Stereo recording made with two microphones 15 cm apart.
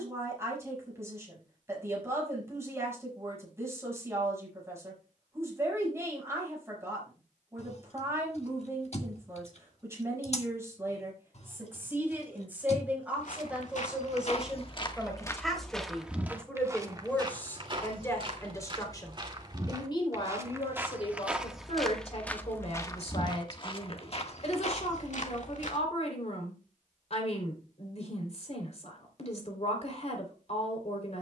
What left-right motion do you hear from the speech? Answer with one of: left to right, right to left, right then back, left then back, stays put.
right to left.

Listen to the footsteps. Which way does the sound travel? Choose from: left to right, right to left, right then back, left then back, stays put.
right then back.